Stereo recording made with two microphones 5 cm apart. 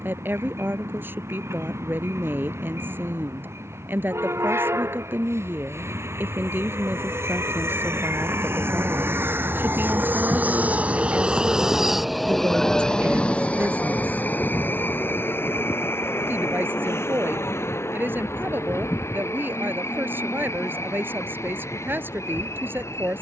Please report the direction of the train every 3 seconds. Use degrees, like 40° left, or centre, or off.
80° right, 70° right, 60° right, 30° right, 30° left, 60° left, 70° left, 70° left.